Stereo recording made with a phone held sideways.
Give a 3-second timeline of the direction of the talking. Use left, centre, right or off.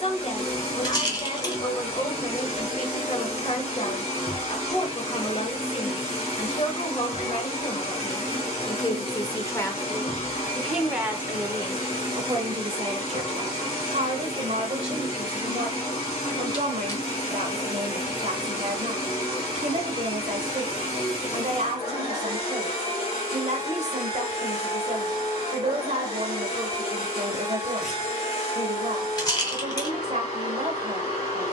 left, left, left, centre, right, right, right, right, right, right, right.